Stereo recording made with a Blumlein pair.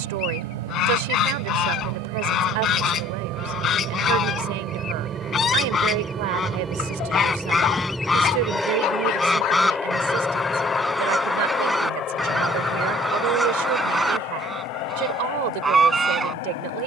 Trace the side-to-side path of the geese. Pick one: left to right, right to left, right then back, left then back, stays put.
left to right.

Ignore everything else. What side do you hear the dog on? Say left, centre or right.
left.